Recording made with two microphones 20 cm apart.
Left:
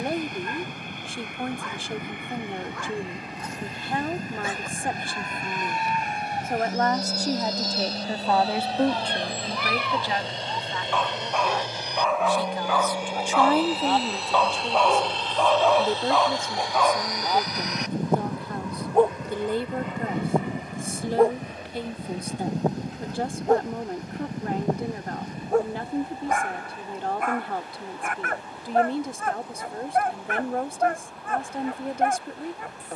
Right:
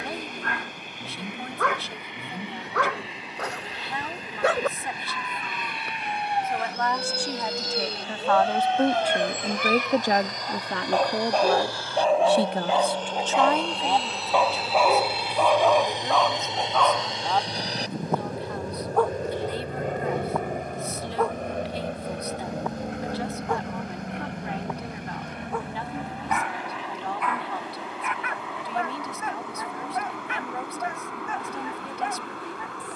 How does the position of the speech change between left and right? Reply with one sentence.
You can hear the speech move from left to right and back again.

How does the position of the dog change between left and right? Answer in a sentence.
You can hear the dog travel towards the left.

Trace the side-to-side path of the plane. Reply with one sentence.
In this clip you hear the plane travel towards the right.